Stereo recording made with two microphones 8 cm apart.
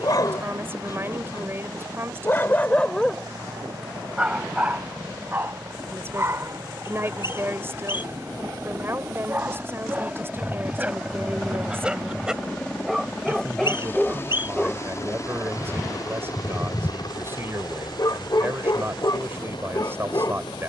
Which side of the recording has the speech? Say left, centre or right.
right.